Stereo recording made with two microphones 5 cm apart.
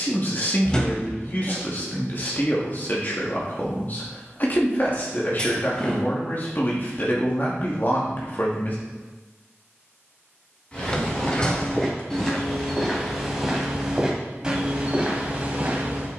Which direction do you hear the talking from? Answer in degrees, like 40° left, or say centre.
40° left.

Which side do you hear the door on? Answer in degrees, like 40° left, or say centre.
20° left.